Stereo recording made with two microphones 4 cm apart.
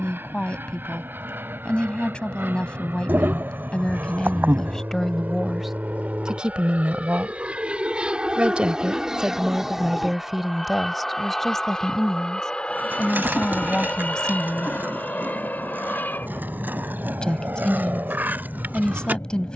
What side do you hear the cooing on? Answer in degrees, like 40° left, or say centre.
50° right.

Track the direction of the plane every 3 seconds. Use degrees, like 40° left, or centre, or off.
70° right, 50° right, 30° right, centre, 30° left, 40° left, 50° left.